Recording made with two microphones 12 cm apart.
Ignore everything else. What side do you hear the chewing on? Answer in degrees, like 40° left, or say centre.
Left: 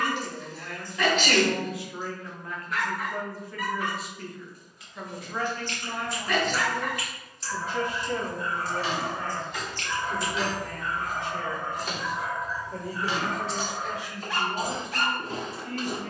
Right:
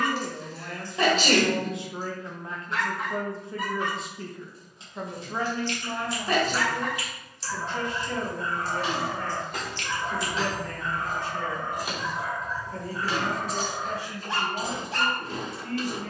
50° left.